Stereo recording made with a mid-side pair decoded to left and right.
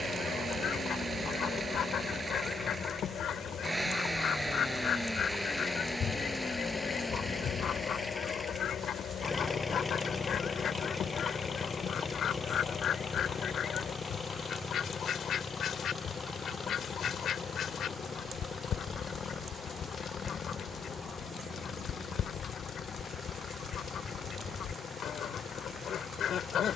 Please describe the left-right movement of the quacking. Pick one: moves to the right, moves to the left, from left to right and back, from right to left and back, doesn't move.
doesn't move.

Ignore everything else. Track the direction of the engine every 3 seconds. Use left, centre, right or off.
right, centre, centre, left, left, left, left, left, left.